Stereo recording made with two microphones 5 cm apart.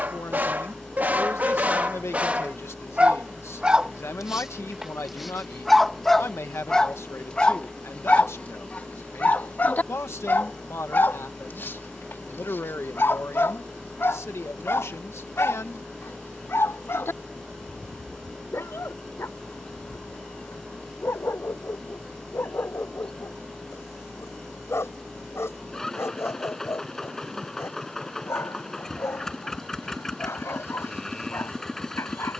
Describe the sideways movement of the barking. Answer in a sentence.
In this clip you hear the barking move from right to left.